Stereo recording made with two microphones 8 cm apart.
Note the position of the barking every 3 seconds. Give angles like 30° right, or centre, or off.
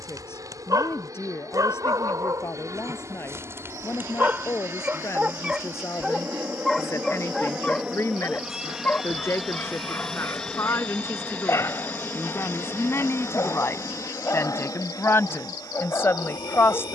40° right, 20° right, 10° left, 30° left, 30° left, 30° left.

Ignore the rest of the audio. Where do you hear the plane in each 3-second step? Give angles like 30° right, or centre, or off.
40° right, 30° right, 10° right, 10° left, 30° left, 50° left.